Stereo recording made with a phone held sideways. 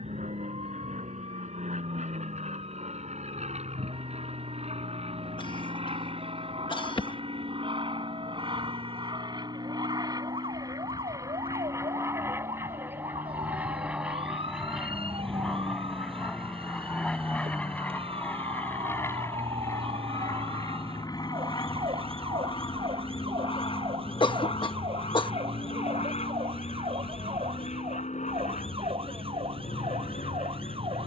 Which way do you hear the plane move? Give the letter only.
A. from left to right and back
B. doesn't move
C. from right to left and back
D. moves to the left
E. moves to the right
D.